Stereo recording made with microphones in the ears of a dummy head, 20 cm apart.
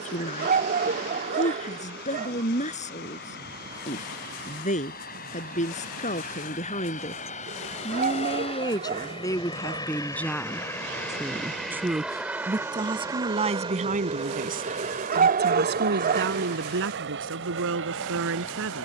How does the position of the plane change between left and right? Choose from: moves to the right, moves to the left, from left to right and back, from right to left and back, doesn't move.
moves to the right.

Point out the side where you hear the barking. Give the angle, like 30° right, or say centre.
40° right.